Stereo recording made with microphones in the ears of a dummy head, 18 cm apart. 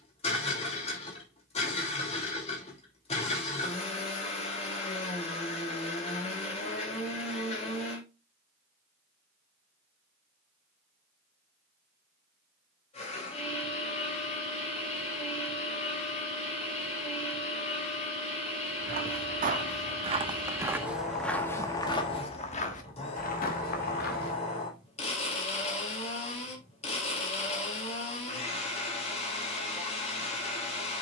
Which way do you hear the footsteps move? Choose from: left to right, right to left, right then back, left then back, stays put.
right to left.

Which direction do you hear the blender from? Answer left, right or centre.
left.